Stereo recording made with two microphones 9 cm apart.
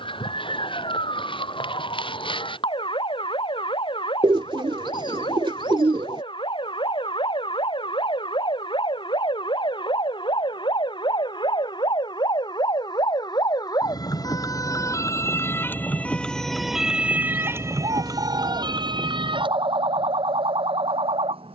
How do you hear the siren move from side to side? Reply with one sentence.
You can hear the siren travel towards the right.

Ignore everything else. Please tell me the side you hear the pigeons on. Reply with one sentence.
You can hear the pigeons on the right.